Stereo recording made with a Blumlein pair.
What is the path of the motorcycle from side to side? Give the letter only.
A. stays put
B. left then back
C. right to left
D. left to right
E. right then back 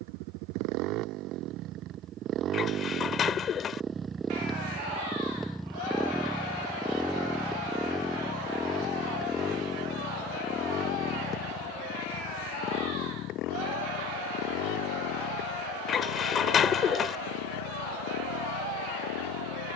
C.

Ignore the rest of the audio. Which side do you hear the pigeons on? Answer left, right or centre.
left.